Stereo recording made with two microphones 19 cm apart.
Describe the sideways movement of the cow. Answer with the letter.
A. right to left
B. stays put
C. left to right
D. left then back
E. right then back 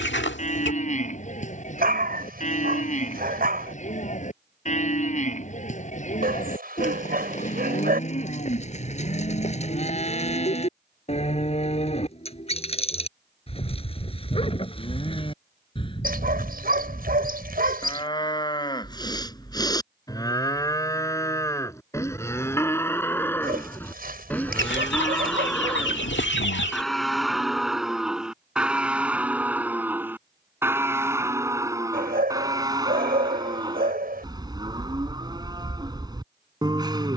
C.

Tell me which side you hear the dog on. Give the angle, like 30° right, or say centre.
50° right.